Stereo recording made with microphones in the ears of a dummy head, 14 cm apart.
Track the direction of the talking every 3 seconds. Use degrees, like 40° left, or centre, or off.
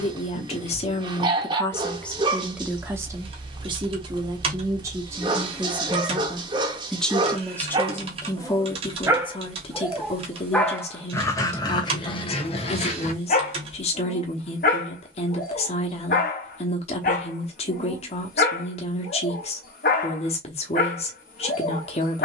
20° left, 20° right, 10° left, 40° left, 40° left, 40° left, 40° left, 40° left.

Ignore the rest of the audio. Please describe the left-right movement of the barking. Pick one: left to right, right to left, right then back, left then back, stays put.
right to left.